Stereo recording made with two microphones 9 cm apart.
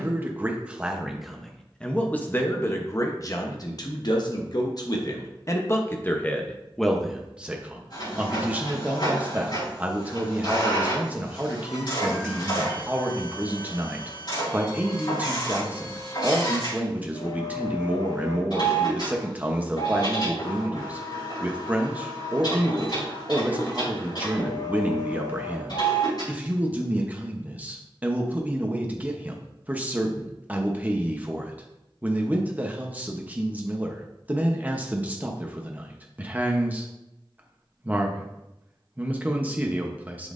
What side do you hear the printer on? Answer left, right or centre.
left.